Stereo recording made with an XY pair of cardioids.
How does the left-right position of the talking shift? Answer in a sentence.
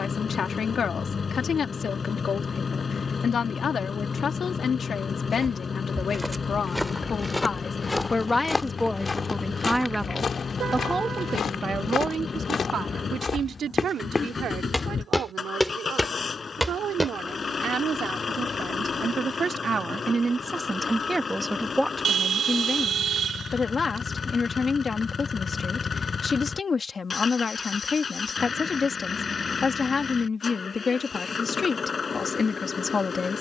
You can hear the talking go right and come back.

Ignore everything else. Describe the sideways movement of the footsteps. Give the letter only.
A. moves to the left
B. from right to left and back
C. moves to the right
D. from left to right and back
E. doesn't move
B.